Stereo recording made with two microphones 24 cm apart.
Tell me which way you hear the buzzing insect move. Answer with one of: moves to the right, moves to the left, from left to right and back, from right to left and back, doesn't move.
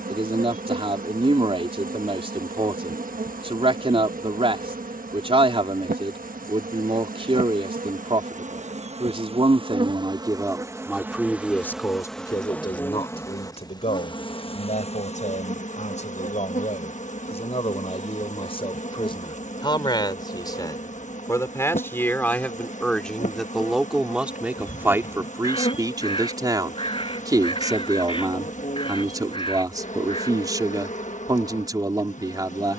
moves to the left.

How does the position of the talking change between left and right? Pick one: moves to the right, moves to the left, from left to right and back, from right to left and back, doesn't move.
from right to left and back.